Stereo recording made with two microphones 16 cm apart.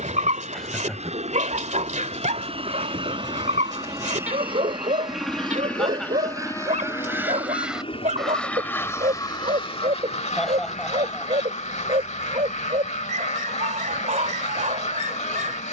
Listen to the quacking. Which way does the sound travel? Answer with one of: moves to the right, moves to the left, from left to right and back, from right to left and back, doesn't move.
moves to the left.